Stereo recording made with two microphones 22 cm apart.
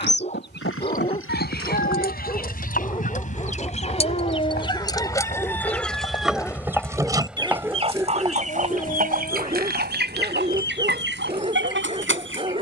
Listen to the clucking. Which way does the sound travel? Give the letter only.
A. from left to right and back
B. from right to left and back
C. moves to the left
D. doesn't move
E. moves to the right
E.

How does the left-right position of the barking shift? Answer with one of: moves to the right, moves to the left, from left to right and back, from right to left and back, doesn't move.
moves to the right.